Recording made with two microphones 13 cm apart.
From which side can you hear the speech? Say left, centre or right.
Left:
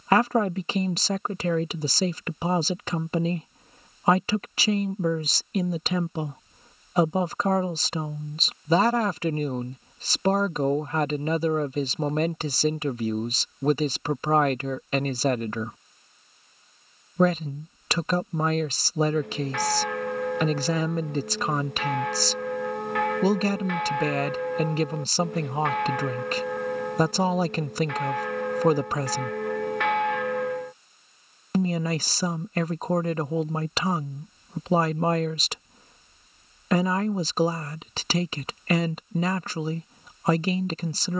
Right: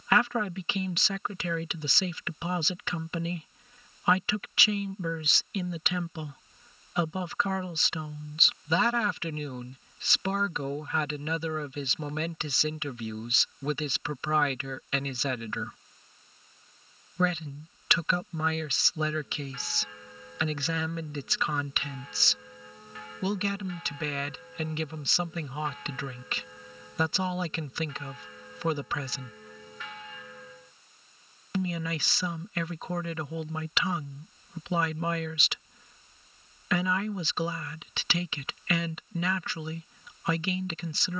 left.